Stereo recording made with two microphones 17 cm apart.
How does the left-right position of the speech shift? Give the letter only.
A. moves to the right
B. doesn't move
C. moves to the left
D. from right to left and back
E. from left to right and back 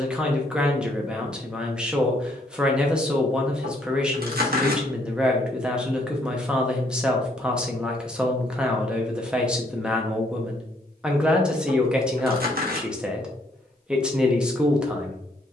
B.